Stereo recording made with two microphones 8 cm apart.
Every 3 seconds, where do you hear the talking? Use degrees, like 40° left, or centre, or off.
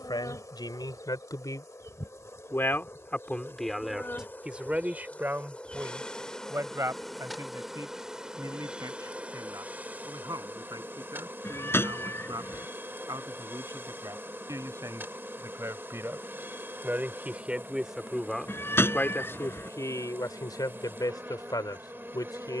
50° left, 10° right, 40° right, 50° right, 50° right, 30° right, 40° left, 60° left.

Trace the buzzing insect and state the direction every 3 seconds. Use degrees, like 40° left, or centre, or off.
40° left, 20° left, centre, 30° right, 30° right, 30° right, 30° right, 30° right.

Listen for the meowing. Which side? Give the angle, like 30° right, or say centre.
30° left.